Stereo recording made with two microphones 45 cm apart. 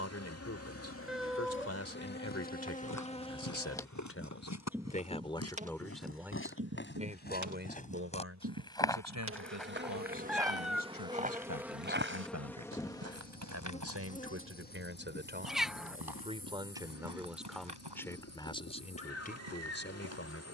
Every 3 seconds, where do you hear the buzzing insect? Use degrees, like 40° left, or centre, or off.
30° left, centre, 40° right, 20° right, 10° left, 30° left, 30° left.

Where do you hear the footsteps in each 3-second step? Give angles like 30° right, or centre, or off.
40° left, 40° left, 20° left, 10° right, 40° right, 60° right, 70° right.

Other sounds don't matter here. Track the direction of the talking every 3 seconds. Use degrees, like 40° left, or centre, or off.
30° left, 20° left, 20° right, 40° right, 30° right, 10° right, 20° left.